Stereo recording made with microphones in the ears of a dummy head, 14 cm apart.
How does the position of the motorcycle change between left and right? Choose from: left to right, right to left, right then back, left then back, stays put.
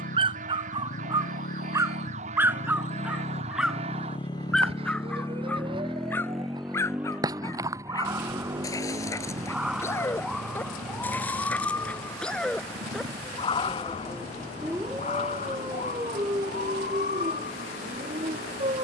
left to right.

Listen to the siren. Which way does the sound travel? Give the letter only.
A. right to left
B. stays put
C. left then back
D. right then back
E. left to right
A.